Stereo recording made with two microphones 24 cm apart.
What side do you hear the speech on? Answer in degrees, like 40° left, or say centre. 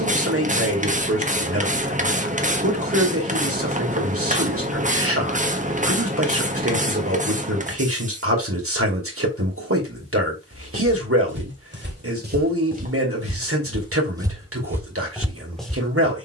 60° right.